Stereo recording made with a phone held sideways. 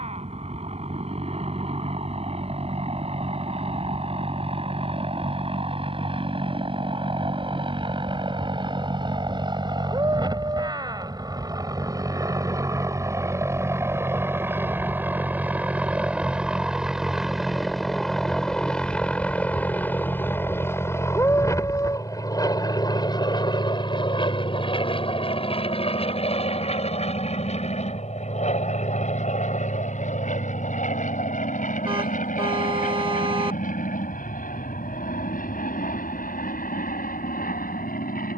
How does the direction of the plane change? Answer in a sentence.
You can hear the plane move to the left.